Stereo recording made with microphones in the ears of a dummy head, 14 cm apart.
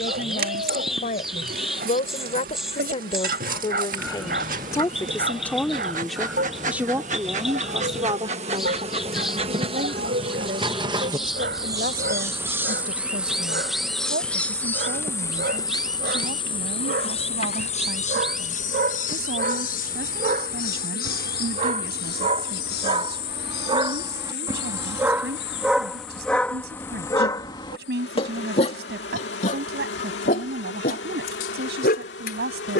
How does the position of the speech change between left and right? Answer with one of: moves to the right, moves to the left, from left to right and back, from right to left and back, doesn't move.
moves to the right.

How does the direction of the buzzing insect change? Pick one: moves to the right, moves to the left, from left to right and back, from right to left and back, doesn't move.
moves to the left.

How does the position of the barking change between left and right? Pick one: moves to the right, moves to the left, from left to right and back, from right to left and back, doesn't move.
moves to the left.